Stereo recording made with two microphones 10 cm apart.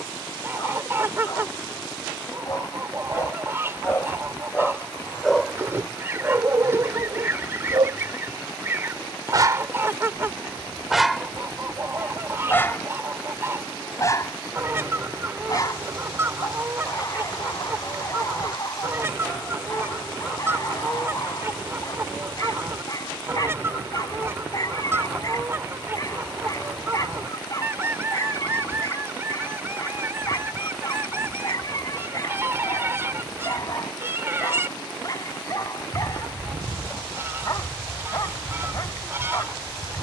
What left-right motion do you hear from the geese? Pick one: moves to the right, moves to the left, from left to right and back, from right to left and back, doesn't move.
doesn't move.